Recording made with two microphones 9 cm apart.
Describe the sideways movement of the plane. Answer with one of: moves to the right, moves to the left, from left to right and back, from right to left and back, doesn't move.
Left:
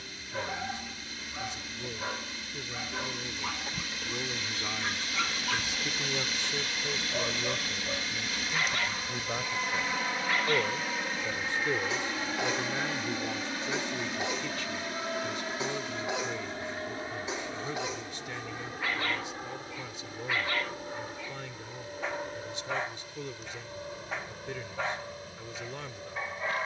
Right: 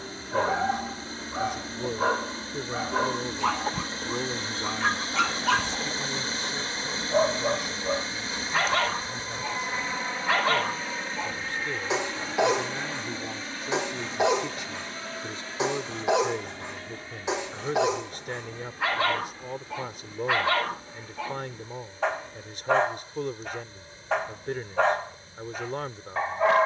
moves to the left.